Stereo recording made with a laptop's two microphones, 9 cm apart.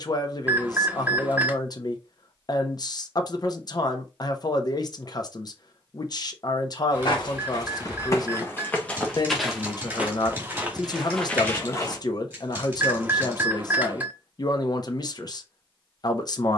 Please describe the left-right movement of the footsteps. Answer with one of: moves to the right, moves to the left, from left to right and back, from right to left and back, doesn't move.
from left to right and back.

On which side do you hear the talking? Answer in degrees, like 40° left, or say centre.
50° left.